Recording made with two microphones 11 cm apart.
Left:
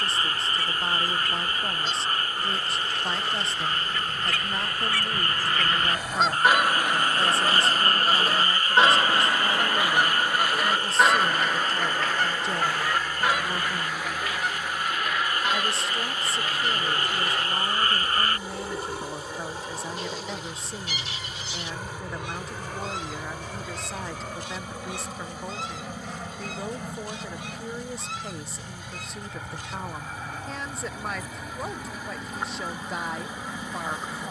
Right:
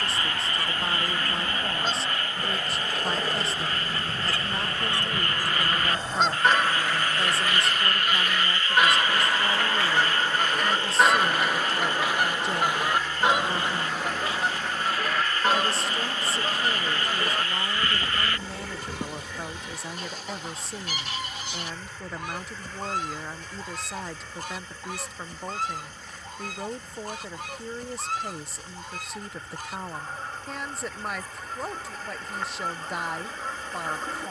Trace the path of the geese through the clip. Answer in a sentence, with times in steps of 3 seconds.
In this clip you hear the geese on the right from 0 s, on the left from 6 s, in the centre from 9 s and on the right from 12 s.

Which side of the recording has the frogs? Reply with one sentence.
You can hear the frogs on the left.